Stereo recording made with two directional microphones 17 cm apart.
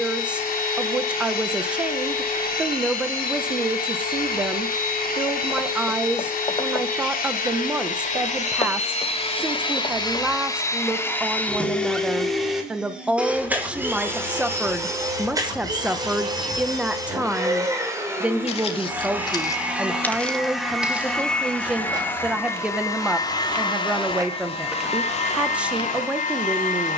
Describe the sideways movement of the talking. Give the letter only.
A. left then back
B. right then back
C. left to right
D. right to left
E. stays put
E.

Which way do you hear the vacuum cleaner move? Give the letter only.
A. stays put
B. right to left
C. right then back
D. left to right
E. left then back
C.